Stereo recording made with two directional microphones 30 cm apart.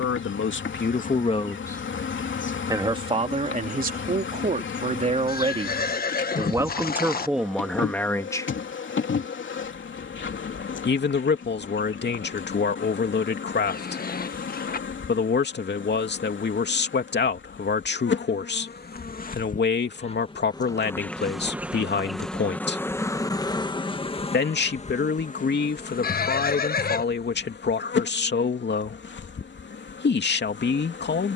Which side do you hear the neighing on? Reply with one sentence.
In this clip you hear the neighing on the left.